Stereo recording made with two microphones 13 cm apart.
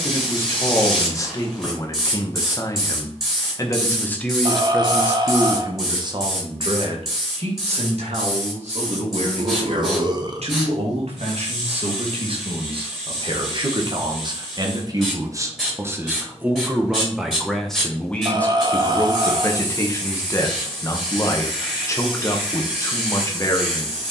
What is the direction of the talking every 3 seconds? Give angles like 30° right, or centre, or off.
30° left, centre, 60° right, 60° right, 40° right, 10° right, 20° left, 30° left.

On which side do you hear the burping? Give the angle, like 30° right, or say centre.
40° right.